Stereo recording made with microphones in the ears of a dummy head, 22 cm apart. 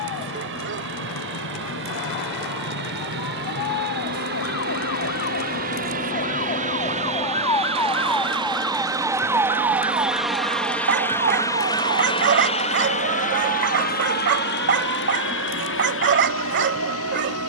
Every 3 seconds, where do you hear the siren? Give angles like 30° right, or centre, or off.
70° left, 50° left, 20° left, 20° right, 50° right, 50° right.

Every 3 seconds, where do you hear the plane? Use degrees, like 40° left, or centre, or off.
50° right, 40° right, 30° right, centre, 30° left, 50° left.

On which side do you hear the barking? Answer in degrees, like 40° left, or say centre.
40° right.